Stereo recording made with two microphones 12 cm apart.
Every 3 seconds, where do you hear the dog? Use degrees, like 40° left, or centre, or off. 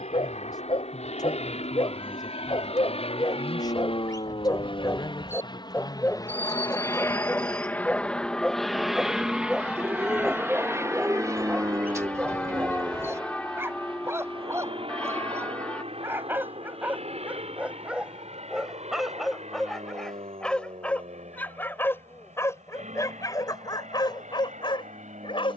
40° left, 30° left, 10° left, 10° right, 20° right, 10° right, centre, 20° left, 40° left.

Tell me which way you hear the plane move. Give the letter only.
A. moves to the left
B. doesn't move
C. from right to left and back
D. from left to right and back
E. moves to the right
E.